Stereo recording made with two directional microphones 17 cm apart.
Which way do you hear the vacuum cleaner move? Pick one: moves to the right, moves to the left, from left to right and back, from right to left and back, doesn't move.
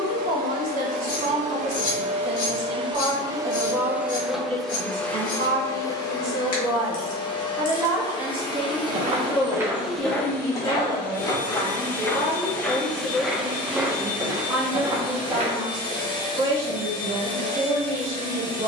moves to the left.